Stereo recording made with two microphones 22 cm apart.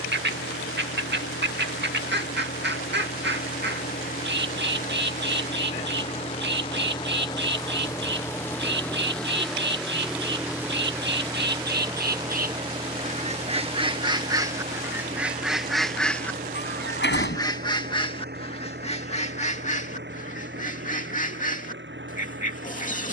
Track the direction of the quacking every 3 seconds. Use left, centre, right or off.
right, right, right, right, right, centre, left, left.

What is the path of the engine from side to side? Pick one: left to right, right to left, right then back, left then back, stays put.
left to right.